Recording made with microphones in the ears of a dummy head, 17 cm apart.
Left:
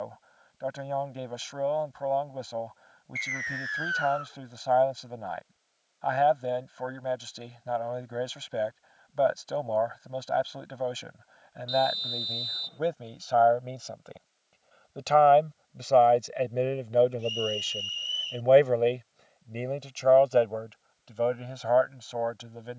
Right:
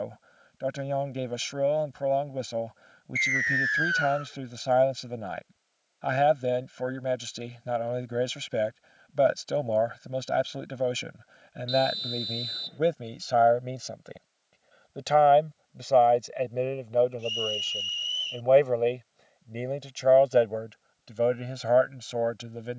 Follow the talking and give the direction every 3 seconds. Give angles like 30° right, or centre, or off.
30° right, 30° right, 30° right, 30° right, 20° right, centre, 10° right, 30° right.